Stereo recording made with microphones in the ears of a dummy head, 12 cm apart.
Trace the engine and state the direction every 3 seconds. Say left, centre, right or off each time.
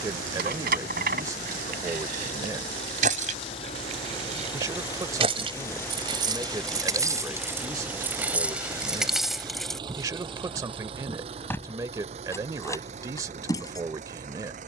left, left, centre, right, right.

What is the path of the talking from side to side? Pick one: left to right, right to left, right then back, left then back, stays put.
stays put.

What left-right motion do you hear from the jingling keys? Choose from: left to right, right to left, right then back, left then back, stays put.
right to left.